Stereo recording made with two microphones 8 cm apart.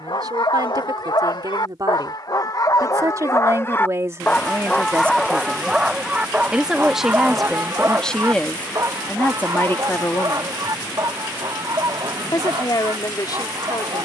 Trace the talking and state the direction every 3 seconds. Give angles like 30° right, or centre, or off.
50° right, 30° right, centre, 30° left, 50° left.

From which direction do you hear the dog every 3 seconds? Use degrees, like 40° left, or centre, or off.
60° left, 10° left, 30° right, 50° right, 60° right.